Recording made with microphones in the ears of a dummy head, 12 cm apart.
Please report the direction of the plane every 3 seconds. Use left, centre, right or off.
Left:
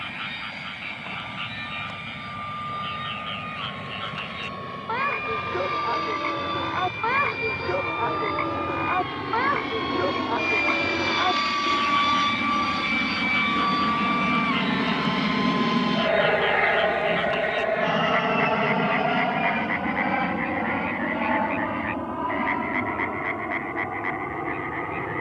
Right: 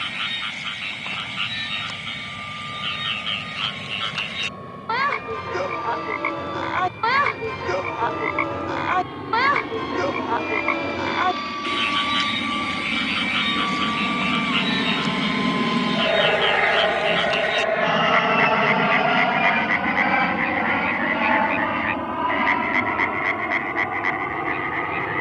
left, left, left, left, left, centre, right, right, right.